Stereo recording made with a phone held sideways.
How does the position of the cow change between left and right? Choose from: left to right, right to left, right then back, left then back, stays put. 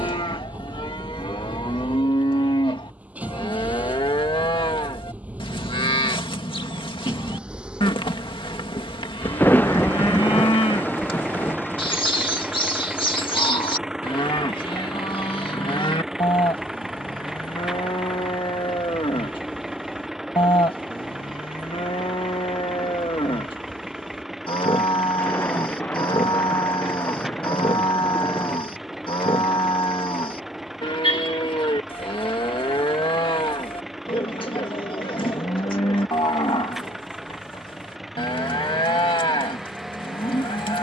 stays put.